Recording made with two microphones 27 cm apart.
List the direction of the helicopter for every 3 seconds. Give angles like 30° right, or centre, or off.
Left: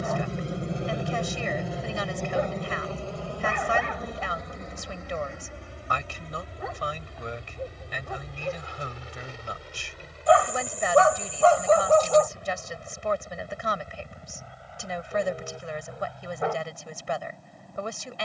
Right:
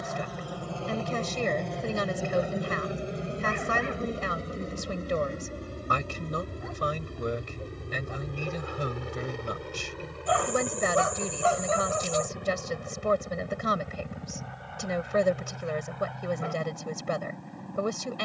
10° left, 30° right, 50° right, 50° right, 60° right, 60° right.